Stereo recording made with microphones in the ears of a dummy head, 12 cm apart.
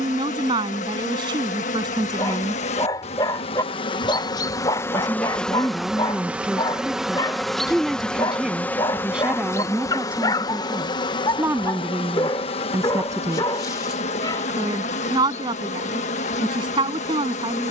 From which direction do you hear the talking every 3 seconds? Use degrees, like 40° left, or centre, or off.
30° right, centre, centre, 10° right, 20° right, 30° right.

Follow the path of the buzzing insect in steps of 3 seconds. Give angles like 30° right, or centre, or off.
60° left, 30° left, centre, 30° left, 50° left, 60° left.